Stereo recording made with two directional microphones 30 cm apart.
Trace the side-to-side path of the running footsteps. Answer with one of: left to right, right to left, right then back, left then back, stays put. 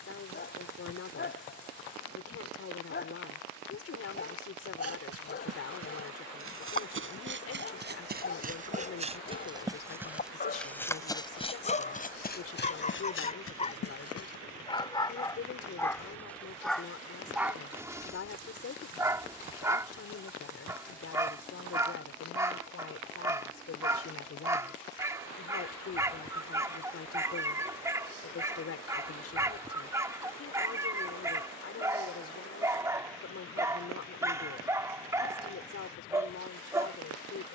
right to left.